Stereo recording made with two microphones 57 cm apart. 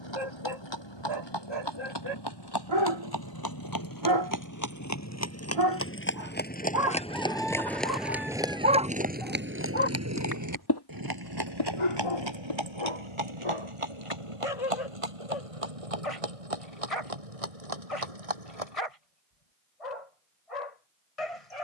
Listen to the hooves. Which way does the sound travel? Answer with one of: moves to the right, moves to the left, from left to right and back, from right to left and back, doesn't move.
moves to the right.